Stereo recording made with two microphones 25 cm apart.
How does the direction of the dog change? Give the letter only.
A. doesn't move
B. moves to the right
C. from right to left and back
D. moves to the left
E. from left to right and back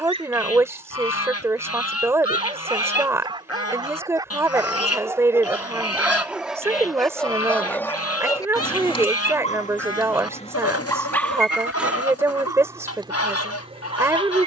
C.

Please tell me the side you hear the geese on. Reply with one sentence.
In this clip you hear the geese on the left.